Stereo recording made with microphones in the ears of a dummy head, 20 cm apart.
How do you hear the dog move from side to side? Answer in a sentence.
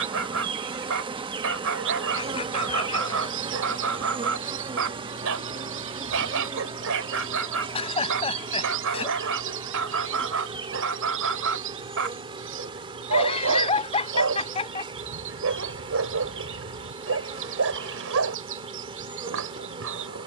You can hear the dog stay in one place.